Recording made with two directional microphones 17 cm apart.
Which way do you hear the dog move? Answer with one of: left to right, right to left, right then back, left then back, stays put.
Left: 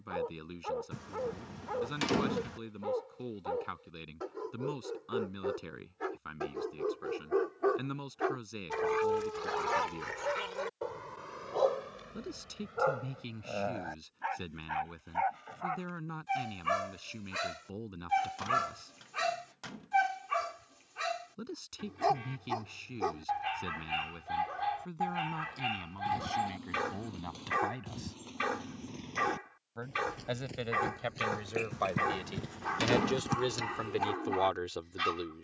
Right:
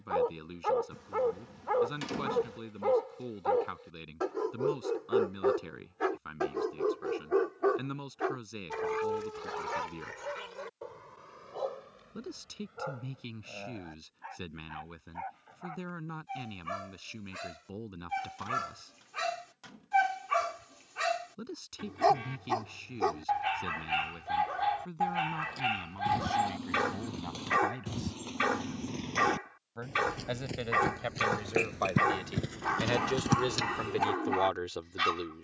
left then back.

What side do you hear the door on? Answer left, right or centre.
left.